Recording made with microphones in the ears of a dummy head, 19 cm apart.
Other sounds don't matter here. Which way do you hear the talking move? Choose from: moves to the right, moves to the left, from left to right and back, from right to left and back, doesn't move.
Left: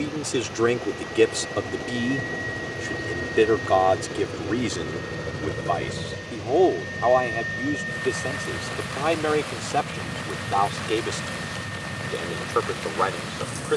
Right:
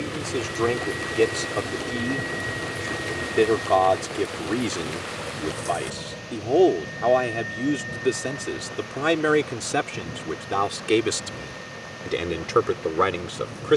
moves to the right.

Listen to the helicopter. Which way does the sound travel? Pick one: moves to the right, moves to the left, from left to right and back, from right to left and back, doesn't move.
moves to the left.